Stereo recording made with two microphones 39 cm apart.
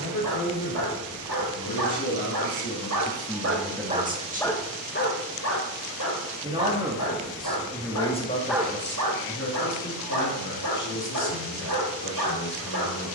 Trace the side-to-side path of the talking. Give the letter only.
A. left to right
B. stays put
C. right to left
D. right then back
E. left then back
D.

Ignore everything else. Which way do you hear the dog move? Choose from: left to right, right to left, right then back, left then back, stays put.
left then back.